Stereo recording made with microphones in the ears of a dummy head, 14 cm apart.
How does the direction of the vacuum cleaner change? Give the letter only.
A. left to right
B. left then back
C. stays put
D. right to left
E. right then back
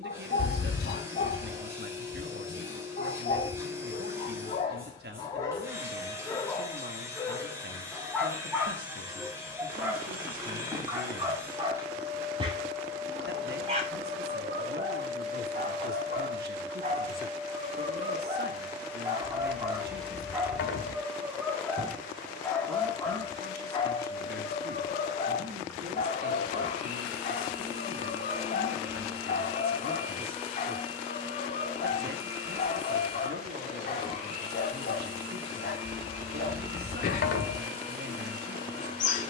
D.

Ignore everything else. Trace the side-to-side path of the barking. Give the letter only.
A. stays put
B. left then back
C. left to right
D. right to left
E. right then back
E.